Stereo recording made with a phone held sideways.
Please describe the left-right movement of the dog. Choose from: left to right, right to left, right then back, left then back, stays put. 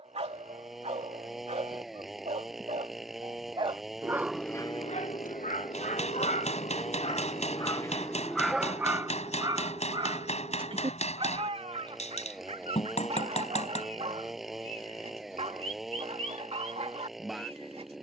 left then back.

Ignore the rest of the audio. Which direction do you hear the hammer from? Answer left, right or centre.
left.